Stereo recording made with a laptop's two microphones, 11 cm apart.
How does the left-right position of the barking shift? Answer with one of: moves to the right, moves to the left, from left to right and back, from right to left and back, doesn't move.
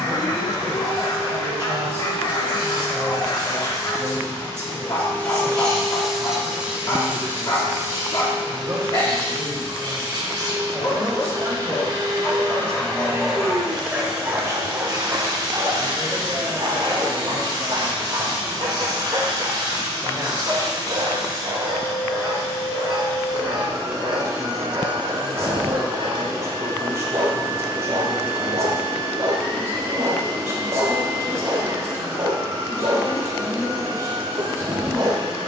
moves to the right.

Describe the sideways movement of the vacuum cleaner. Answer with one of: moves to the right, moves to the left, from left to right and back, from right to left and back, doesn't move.
moves to the right.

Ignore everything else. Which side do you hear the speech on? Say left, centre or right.
right.